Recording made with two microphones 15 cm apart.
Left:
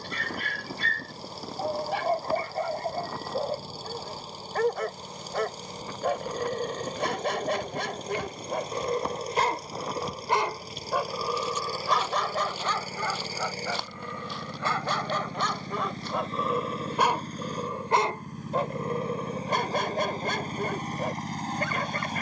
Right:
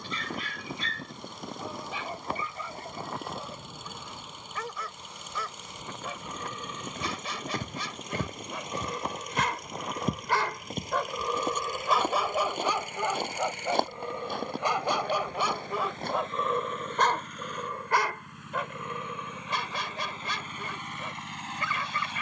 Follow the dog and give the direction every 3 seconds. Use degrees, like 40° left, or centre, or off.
60° left, 60° left, 50° left, 20° left, 20° right, centre, 40° left, 50° left.